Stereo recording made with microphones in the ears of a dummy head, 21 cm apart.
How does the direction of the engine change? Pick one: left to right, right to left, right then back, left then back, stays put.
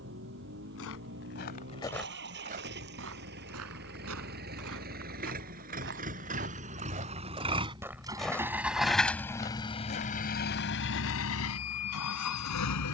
right to left.